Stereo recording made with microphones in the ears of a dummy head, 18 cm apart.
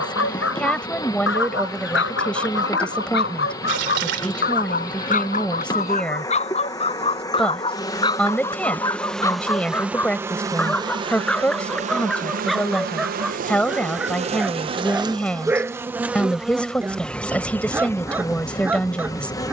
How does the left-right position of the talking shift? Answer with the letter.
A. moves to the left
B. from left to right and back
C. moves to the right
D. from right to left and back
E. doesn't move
E.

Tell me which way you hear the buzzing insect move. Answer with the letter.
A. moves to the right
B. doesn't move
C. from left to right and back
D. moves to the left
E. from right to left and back
C.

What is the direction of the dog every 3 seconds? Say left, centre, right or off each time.
left, left, left, centre, centre, centre, centre.